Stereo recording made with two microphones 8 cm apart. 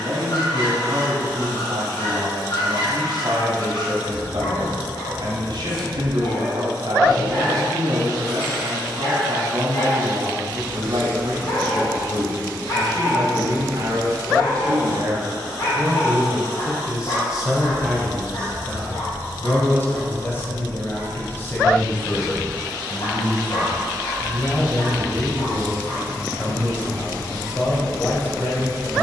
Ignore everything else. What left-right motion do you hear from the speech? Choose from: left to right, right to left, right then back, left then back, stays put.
right to left.